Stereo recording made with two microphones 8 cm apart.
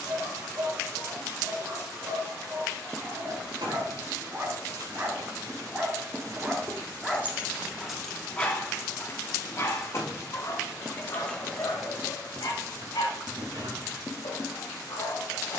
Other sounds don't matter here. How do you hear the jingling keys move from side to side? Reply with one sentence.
You can hear the jingling keys go left and come back.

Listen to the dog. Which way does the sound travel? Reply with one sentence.
You can hear the dog go from the right side to the left.